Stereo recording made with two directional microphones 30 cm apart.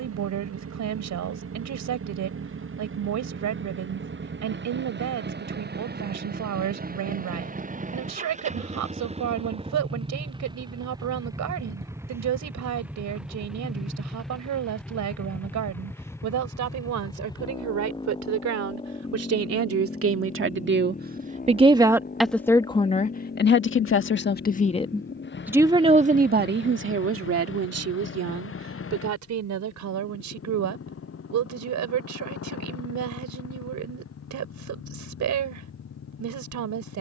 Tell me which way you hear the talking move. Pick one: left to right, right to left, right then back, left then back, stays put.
left then back.